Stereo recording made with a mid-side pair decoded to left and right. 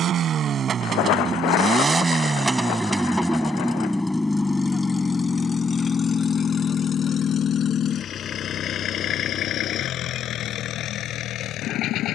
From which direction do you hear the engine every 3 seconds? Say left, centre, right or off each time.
right, centre, left, left.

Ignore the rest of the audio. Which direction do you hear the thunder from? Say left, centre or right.
left.